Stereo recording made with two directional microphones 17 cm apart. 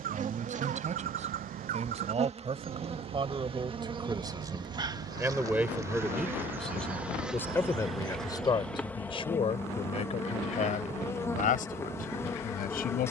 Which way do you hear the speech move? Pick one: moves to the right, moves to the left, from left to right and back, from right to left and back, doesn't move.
moves to the left.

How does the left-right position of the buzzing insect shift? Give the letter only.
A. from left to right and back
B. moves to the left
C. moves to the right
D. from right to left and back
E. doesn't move
B.